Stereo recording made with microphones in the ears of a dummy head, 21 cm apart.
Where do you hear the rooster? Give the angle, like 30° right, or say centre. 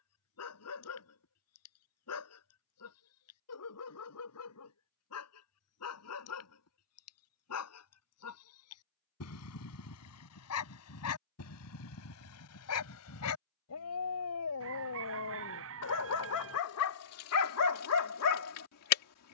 60° right.